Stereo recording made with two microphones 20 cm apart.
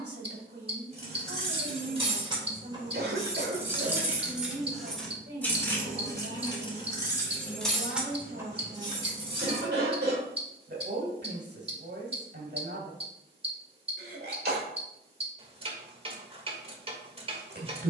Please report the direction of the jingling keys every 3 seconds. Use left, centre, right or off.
right, centre, centre, right, off, off.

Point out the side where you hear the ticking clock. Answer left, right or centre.
right.